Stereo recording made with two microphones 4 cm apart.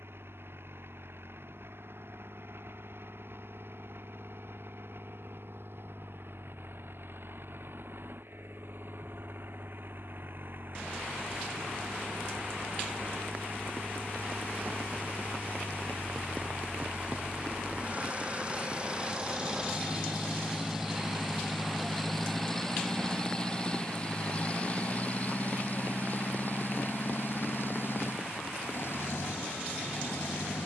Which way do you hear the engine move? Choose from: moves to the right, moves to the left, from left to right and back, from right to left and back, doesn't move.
moves to the left.